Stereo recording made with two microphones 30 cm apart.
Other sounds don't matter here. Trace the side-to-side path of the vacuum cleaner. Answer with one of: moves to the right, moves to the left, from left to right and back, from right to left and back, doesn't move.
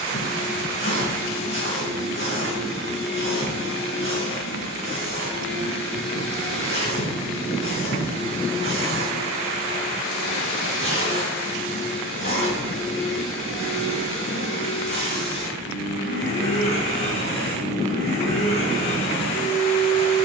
doesn't move.